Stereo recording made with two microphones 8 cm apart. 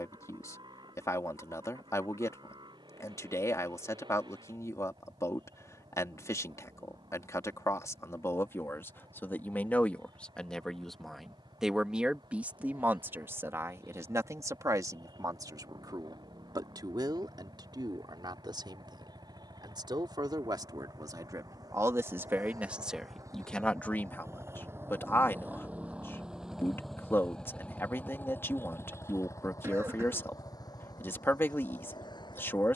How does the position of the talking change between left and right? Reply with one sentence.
In this clip you hear the talking go right and come back.